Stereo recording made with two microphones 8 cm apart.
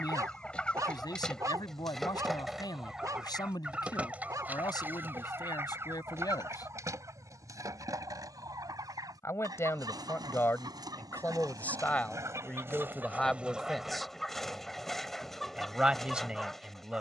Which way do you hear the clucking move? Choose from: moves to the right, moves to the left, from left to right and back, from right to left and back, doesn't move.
from left to right and back.